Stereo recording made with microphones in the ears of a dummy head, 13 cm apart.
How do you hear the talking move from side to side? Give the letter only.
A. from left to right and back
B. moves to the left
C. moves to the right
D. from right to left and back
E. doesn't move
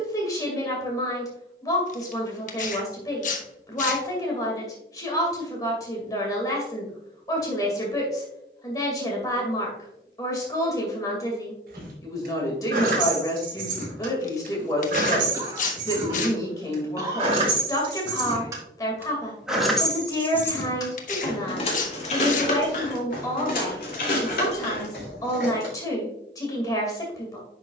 E.